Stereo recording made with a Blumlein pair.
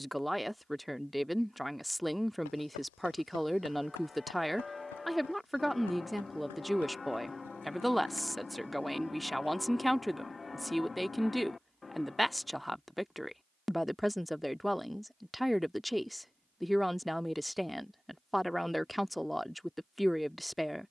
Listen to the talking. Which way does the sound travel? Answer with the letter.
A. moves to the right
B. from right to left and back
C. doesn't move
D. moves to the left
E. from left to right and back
C.